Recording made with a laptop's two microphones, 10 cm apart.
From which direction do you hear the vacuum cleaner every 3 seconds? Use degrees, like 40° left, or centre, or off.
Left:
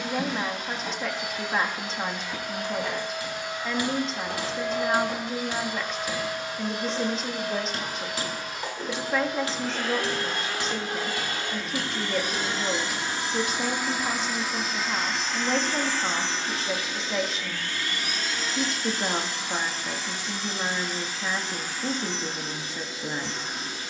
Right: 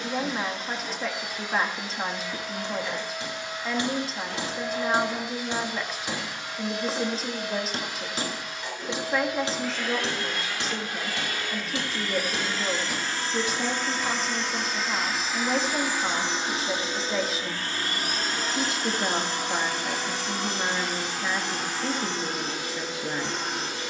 60° left, 50° left, 50° left, 40° left, 10° left, 20° right, 60° right, 70° right.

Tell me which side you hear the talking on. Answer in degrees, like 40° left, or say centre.
centre.